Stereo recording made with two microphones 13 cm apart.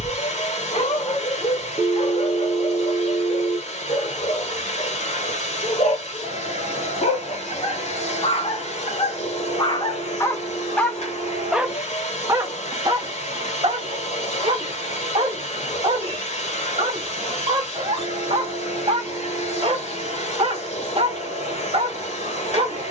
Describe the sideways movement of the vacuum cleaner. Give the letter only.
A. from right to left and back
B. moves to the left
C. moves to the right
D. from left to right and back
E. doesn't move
E.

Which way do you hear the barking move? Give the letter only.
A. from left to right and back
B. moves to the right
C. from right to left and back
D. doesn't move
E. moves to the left
B.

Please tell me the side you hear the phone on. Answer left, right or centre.
left.